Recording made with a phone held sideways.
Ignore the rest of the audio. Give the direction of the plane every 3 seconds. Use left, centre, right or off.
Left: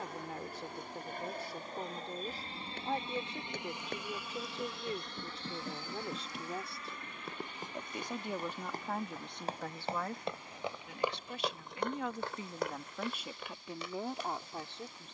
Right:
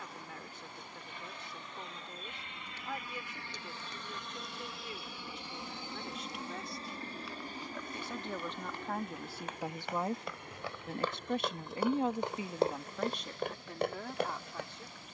left, centre, right, right, right.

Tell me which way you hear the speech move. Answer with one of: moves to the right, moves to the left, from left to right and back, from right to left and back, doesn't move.
from left to right and back.